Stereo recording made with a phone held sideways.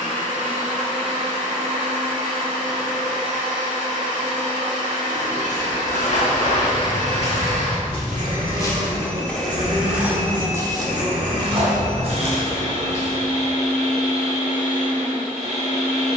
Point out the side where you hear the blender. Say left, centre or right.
right.